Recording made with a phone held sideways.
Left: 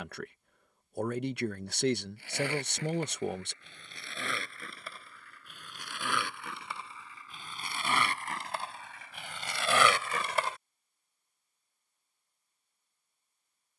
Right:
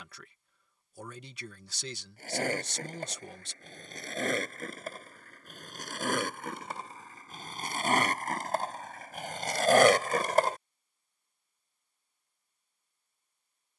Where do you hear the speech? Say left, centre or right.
left.